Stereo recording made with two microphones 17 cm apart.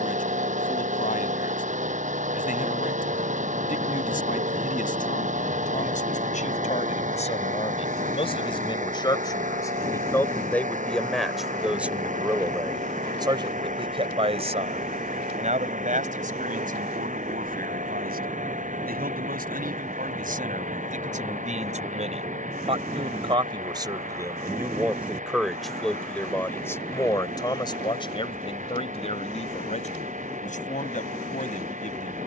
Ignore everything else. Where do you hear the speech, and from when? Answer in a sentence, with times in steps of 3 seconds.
In this clip you hear the speech on the left from 0 s, in the centre from 9 s, on the right from 12 s, in the centre from 24 s and on the left from 27 s.